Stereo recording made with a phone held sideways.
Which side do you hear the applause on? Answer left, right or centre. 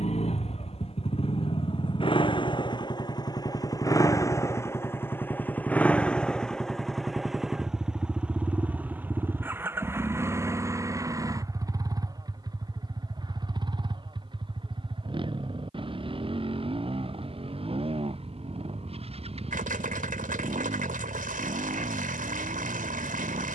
right.